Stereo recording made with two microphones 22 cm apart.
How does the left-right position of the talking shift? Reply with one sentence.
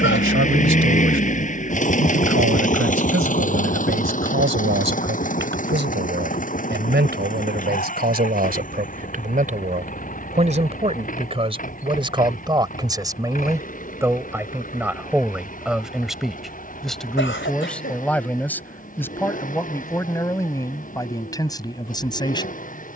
In this clip you hear the talking move to the left.